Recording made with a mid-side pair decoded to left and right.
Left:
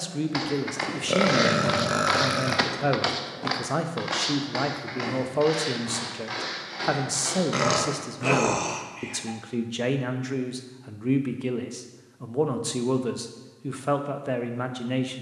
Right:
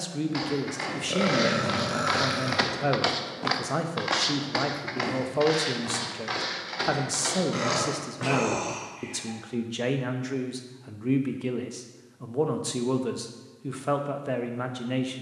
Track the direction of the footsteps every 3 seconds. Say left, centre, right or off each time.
left, right, right, off, off.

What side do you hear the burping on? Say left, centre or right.
left.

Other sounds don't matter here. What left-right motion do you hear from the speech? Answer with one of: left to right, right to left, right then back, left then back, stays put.
stays put.